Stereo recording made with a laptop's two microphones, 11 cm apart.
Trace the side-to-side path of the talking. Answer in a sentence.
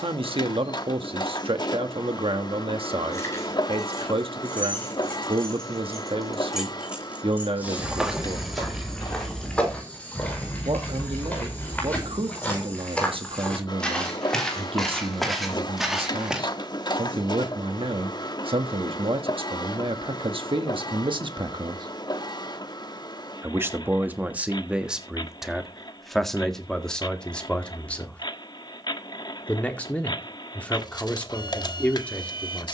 In this clip you hear the talking move to the left.